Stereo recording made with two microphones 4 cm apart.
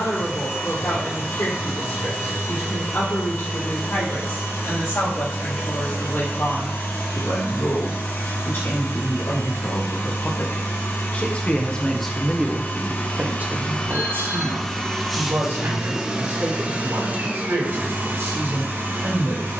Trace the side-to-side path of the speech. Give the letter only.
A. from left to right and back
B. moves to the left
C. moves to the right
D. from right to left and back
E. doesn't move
C.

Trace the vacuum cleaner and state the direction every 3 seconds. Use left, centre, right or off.
left, left, left, left, left, right, right.